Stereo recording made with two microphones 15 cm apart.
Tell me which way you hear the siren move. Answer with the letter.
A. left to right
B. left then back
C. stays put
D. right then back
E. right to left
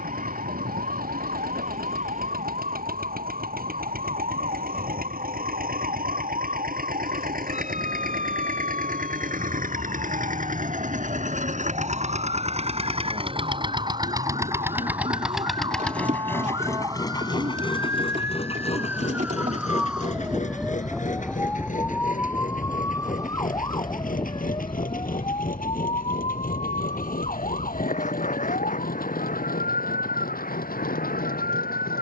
E.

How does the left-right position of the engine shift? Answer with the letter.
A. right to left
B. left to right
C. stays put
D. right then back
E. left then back
A.